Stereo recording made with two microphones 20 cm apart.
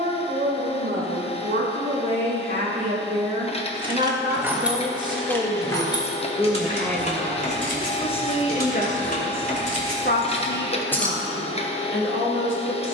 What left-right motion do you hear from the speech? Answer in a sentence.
You can hear the speech travel towards the left.